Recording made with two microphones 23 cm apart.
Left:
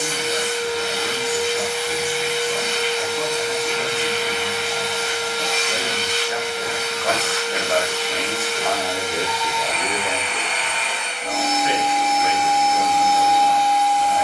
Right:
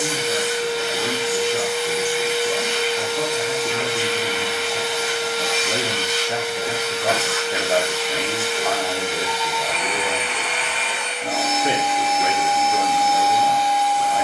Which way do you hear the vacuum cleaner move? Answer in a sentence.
You can hear the vacuum cleaner stay in one place.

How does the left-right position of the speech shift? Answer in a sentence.
In this clip you hear the speech move from right to left and back again.